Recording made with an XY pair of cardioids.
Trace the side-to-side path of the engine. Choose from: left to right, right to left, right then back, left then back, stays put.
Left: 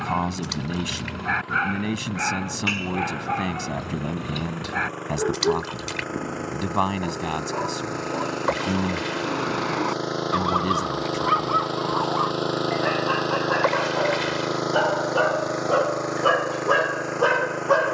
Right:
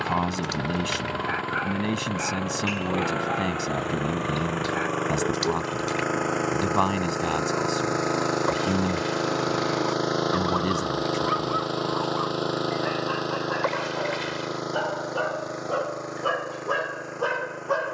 right to left.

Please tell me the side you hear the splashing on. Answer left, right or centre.
left.